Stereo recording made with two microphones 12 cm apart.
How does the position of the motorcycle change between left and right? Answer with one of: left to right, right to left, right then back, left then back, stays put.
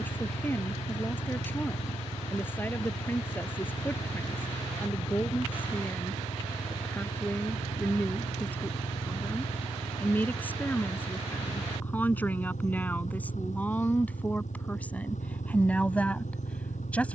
stays put.